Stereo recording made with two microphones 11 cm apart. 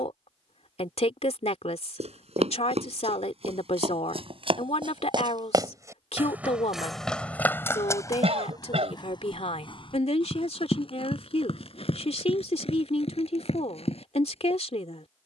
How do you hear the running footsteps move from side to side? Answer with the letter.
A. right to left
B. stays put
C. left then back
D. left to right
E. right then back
A.